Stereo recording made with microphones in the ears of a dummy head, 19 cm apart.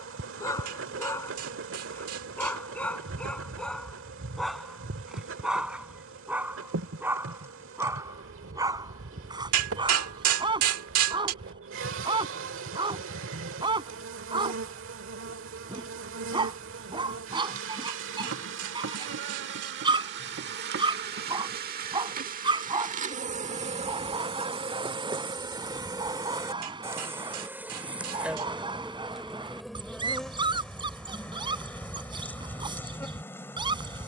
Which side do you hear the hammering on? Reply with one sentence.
You can hear the hammering on the right.